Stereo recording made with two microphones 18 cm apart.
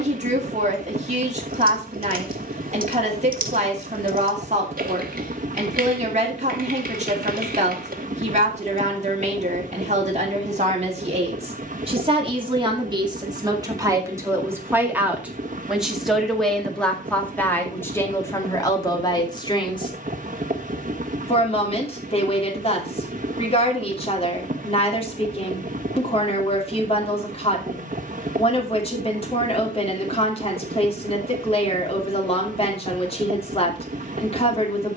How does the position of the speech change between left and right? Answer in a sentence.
You can hear the speech travel towards the left.